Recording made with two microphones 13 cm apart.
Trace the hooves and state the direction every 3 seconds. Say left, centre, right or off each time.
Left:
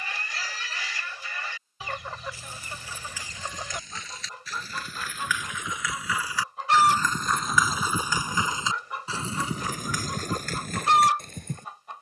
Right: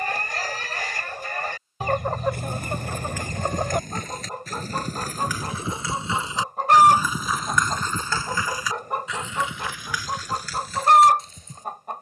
right, right, centre, left.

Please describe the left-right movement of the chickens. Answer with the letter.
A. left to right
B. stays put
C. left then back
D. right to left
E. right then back
B.